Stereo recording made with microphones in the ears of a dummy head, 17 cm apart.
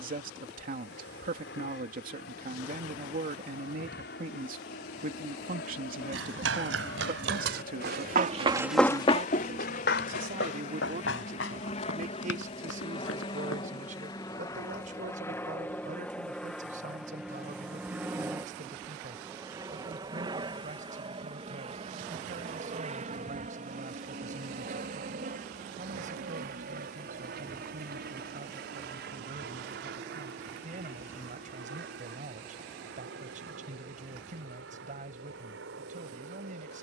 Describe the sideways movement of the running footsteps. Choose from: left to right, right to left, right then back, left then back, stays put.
right to left.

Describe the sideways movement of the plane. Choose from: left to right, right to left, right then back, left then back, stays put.
left to right.